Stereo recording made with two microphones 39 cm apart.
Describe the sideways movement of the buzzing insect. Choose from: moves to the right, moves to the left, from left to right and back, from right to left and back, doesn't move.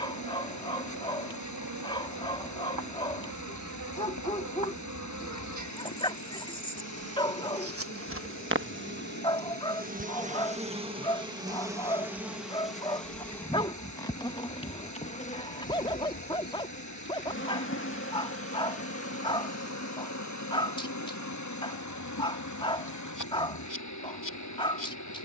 moves to the left.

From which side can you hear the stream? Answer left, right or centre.
left.